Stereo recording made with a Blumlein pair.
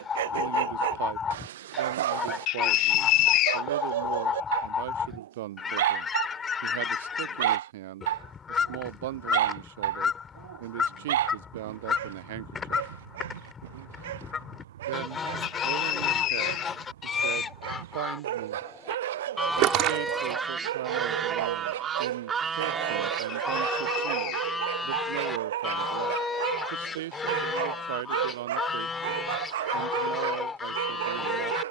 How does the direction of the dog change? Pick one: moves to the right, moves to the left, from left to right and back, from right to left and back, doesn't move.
doesn't move.